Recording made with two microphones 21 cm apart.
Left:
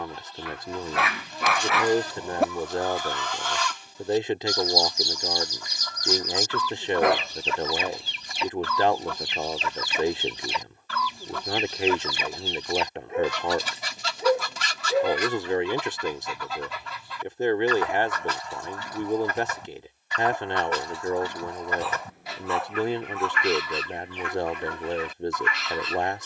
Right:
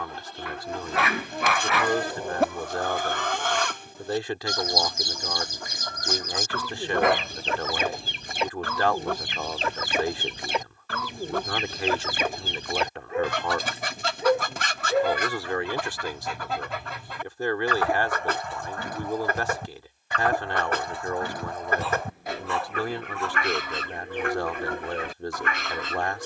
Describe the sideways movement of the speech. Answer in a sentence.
You can hear the speech stay put.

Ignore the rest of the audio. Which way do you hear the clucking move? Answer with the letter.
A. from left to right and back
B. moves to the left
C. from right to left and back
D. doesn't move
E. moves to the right
D.